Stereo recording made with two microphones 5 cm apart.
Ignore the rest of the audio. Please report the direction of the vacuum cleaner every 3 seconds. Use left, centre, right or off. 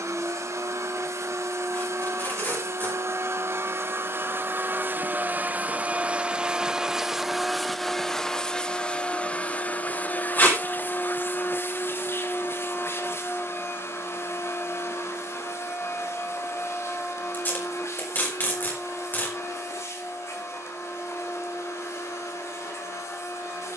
right, right, centre, left, left, left, left, left.